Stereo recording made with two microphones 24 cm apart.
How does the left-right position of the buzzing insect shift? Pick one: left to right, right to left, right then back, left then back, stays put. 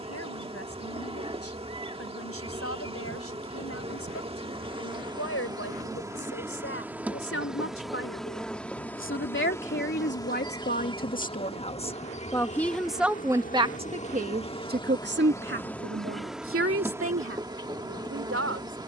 left then back.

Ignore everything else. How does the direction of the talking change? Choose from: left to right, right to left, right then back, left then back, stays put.
left to right.